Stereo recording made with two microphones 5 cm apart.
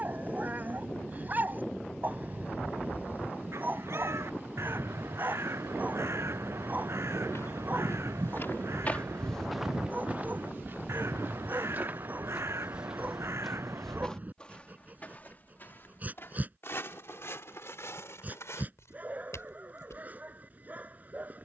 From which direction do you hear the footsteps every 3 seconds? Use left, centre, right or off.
off, off, left, right, centre, left, left.